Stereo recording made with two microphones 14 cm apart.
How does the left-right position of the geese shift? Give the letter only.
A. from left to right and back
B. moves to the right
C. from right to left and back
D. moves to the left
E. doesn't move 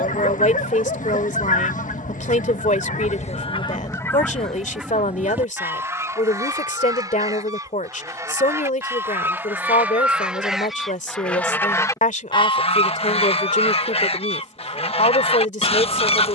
A.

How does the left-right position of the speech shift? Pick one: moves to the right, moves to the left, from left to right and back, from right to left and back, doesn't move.
doesn't move.